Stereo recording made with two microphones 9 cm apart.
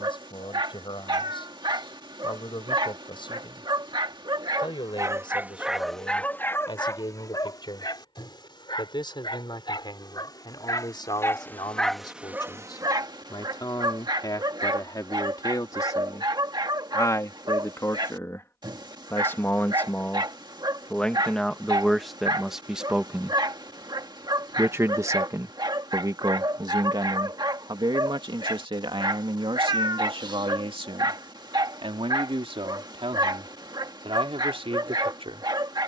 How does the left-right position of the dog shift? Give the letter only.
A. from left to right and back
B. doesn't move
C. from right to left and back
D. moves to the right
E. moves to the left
C.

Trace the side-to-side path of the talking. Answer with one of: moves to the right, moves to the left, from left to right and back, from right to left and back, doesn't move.
moves to the right.